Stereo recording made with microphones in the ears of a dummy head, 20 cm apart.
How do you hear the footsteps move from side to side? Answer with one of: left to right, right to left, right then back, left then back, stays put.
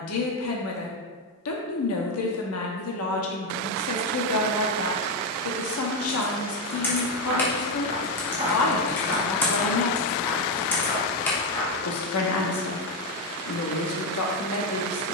right to left.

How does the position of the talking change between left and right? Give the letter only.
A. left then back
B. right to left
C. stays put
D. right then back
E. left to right
C.